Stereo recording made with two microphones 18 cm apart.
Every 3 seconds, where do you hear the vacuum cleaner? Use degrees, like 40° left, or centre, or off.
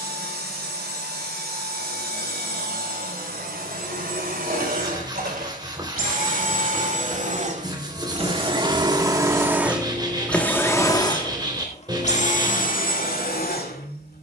70° right, 60° right, 40° right, 10° left, 50° left.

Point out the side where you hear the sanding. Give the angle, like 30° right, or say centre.
20° right.